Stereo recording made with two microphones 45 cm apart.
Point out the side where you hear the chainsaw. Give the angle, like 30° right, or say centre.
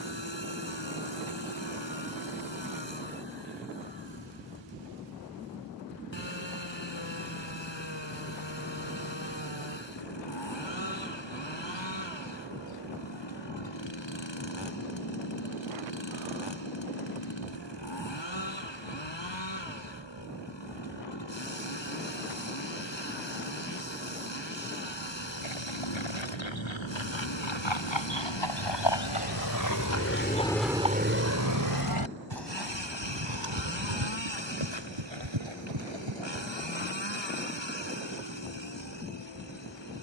70° left.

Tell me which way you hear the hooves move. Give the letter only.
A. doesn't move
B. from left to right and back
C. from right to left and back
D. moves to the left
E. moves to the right
E.